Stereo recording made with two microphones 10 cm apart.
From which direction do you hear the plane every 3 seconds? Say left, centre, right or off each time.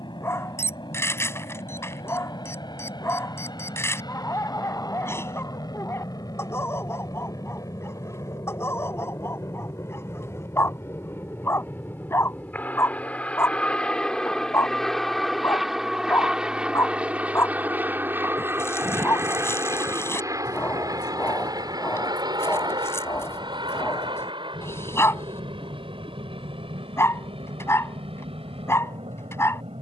left, left, left, left, centre, centre, right, right, right, right.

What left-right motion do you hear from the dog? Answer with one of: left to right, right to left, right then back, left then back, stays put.
stays put.